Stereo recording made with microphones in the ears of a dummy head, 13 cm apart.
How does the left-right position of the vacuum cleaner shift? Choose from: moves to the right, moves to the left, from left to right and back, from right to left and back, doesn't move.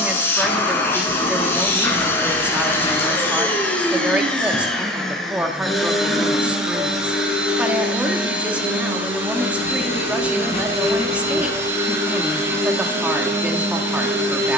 moves to the right.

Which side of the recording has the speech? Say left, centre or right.
centre.